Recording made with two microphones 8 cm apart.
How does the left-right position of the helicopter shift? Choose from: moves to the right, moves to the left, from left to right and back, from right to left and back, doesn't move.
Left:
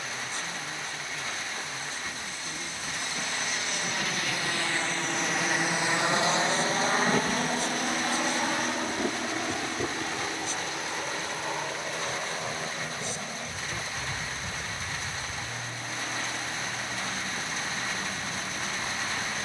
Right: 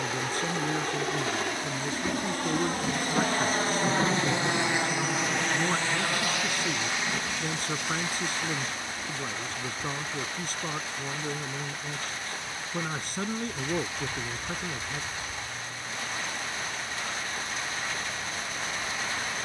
moves to the left.